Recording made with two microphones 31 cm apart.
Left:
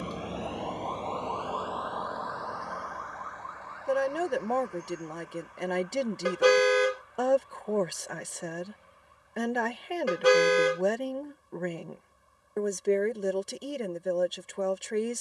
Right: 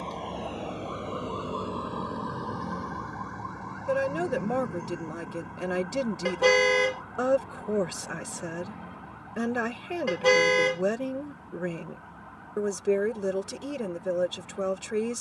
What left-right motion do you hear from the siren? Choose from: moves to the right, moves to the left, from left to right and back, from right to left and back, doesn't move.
moves to the right.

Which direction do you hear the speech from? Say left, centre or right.
centre.